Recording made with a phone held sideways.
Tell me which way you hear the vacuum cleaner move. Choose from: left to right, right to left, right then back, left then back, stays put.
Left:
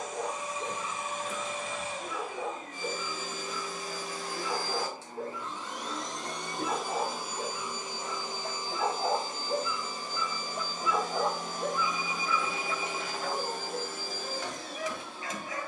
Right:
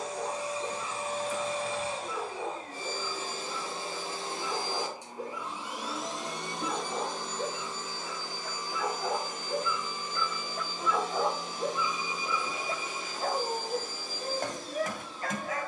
right to left.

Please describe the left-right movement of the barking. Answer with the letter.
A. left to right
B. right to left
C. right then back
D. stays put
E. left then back
A.